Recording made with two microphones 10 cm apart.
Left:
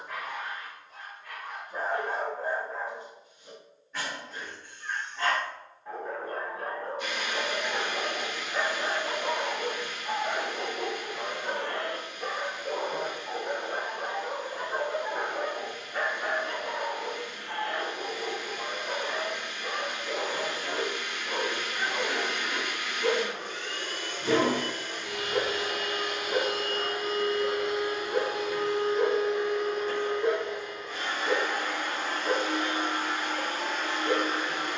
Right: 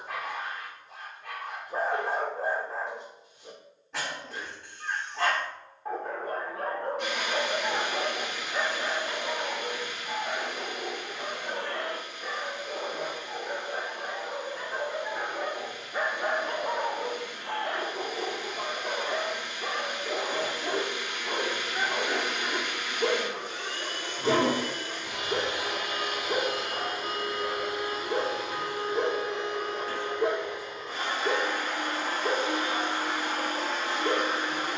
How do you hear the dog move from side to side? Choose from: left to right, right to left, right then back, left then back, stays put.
left then back.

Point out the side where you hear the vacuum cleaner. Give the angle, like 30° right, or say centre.
80° right.